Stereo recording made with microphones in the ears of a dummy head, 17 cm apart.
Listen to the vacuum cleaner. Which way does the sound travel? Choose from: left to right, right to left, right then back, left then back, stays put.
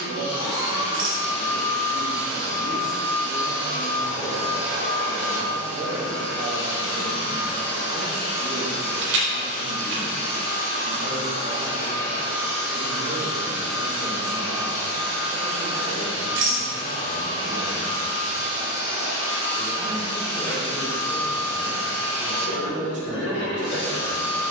stays put.